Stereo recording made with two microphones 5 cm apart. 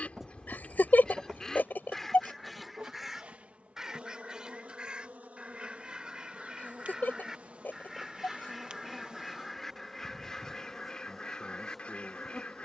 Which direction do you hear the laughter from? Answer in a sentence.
You can hear the laughter on the left.